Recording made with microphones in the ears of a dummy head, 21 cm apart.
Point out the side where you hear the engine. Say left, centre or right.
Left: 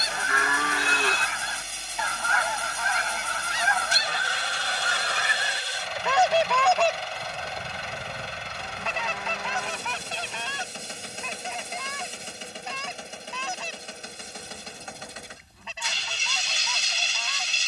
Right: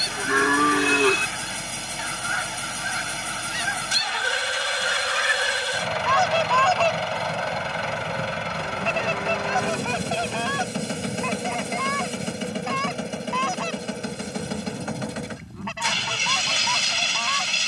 right.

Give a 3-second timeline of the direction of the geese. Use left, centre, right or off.
left, left, centre, right, right, right.